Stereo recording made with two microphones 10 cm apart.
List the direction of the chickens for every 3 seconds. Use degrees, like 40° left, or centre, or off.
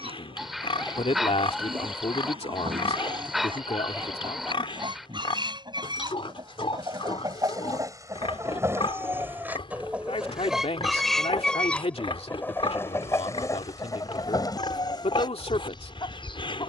60° right, 50° right, 40° right, 10° right, 30° left, 50° left.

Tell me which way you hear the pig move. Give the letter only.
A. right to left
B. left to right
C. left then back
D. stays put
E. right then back
D.